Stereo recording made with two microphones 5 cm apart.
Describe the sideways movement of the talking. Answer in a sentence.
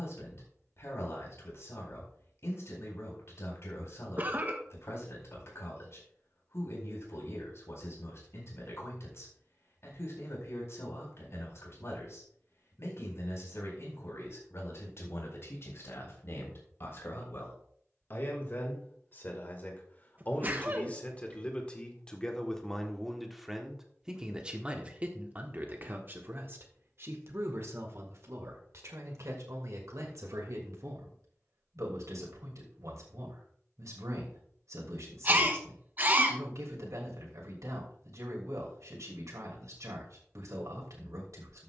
You can hear the talking go from the left side to the right.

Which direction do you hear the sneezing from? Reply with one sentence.
You can hear the sneezing on the right.